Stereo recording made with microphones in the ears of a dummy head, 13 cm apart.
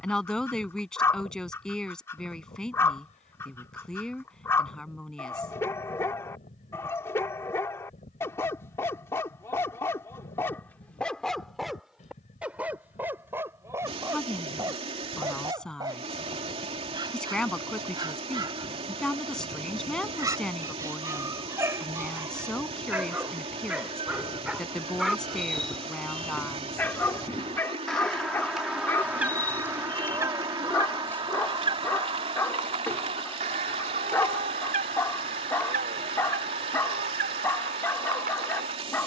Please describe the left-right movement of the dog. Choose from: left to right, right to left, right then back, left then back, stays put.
right then back.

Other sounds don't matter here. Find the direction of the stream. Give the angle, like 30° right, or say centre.
40° right.